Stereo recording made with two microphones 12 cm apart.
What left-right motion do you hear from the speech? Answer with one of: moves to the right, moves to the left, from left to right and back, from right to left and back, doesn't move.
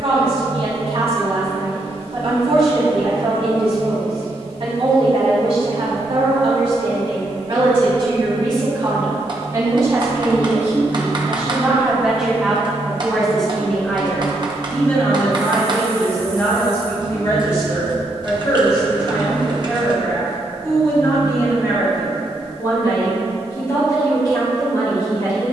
moves to the left.